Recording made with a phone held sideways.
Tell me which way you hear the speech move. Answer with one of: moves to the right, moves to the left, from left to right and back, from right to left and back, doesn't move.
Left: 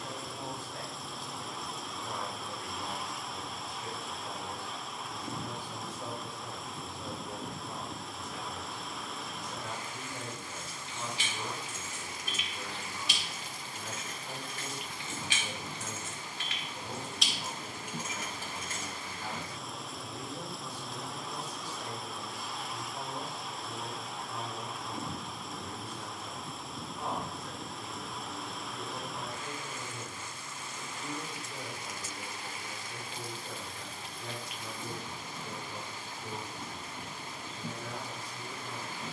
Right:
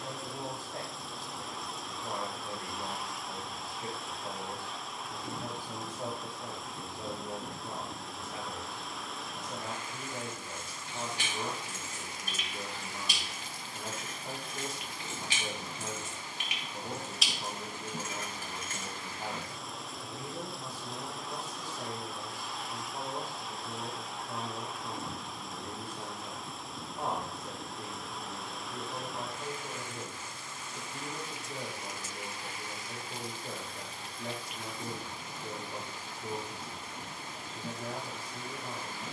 doesn't move.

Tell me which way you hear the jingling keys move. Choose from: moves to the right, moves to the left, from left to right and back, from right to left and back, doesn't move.
moves to the left.